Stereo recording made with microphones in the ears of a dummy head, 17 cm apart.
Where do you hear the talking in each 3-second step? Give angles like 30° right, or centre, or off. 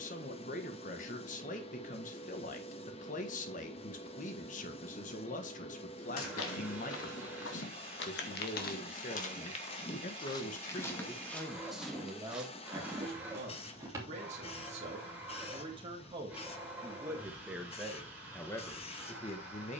40° left, 40° left, 40° left, 30° left, 30° right, 20° right, 20° left.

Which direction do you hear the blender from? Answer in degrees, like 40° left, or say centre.
10° right.